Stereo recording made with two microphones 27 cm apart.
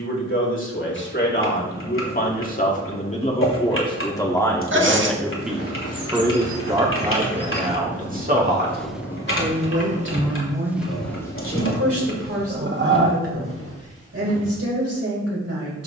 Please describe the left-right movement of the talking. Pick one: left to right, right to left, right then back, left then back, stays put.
left to right.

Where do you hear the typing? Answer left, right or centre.
left.